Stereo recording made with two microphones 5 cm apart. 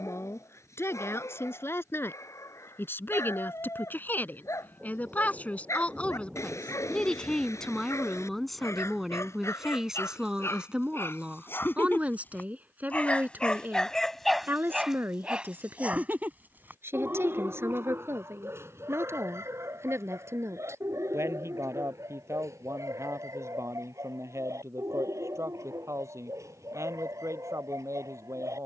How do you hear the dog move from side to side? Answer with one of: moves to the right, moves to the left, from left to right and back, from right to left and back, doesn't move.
moves to the right.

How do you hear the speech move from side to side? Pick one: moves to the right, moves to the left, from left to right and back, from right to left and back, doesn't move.
moves to the right.